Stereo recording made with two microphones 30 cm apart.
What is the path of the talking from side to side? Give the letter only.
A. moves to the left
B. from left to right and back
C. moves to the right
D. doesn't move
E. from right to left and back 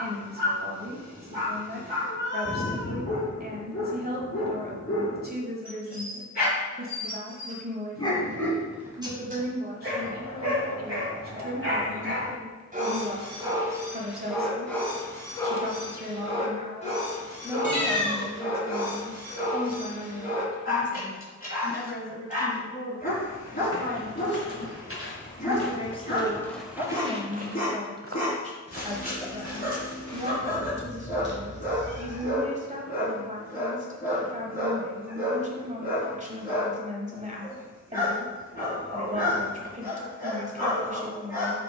E.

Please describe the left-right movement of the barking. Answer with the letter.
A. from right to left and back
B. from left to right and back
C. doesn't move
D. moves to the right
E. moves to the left
B.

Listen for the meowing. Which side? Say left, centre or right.
left.